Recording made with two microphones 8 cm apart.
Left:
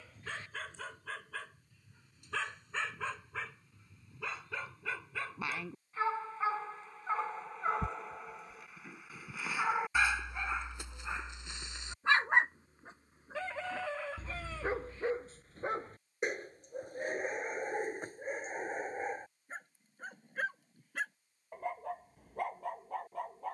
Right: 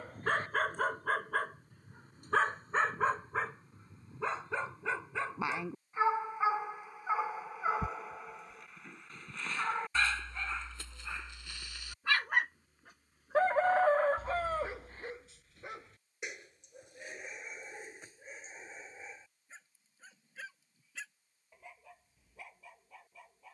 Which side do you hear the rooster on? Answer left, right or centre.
right.